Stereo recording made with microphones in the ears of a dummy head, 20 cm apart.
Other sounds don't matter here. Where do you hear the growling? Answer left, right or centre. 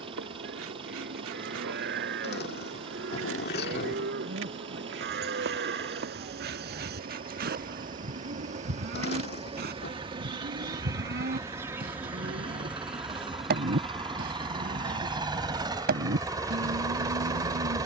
left.